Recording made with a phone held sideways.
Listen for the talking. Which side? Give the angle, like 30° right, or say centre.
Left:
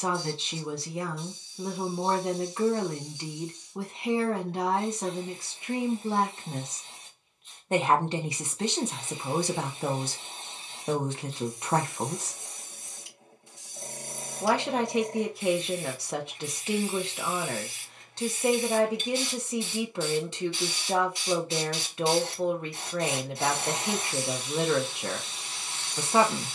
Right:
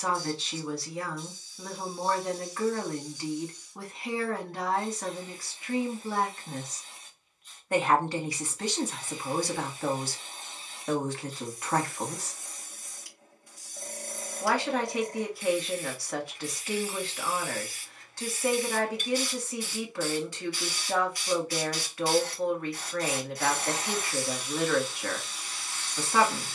20° left.